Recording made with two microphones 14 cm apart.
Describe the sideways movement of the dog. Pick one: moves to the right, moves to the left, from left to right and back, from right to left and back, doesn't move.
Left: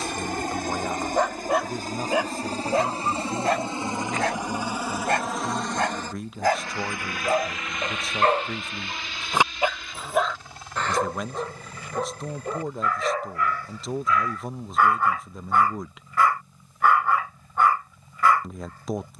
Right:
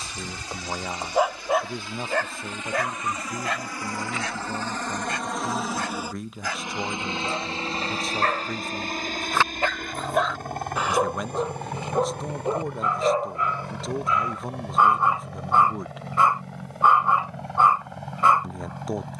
from right to left and back.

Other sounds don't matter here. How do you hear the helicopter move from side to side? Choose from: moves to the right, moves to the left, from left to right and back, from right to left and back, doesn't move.
moves to the right.